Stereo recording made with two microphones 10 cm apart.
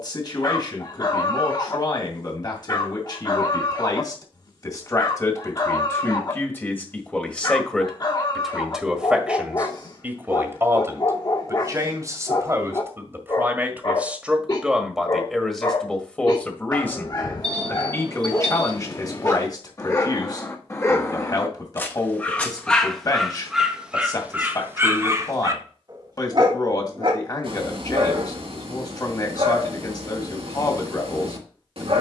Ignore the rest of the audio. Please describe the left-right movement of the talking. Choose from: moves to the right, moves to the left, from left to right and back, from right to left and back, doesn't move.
from left to right and back.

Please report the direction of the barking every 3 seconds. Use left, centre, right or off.
left, left, left, left, left, left, left, centre, right, right, right.